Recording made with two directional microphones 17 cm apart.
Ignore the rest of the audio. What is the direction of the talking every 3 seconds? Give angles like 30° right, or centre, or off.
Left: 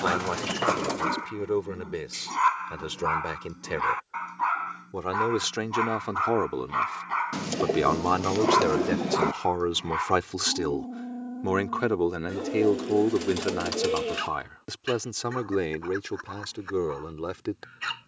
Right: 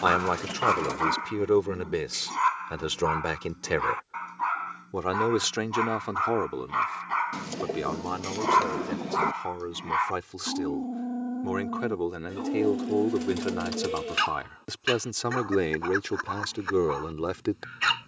30° right, 20° right, 30° left, 40° left, 10° left, 20° right.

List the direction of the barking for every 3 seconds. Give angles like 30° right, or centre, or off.
10° right, 10° left, 10° right, 30° right, 40° right, 50° right.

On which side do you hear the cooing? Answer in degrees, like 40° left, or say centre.
20° left.